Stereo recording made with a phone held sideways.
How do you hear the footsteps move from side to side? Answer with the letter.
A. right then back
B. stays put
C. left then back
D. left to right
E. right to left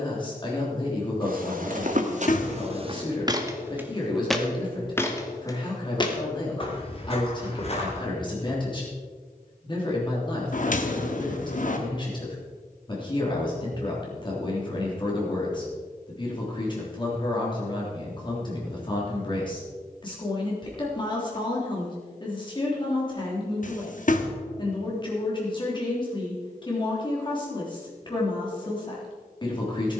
E.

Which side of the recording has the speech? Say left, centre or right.
left.